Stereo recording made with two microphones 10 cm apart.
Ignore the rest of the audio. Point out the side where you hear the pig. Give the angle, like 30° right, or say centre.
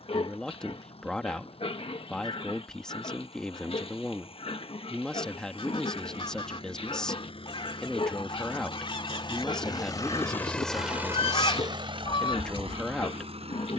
70° left.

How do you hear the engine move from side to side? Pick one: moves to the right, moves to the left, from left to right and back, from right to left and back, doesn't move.
moves to the right.